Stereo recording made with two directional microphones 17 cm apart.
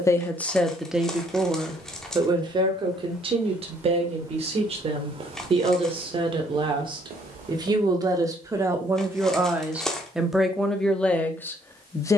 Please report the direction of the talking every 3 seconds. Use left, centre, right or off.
centre, right, right, centre.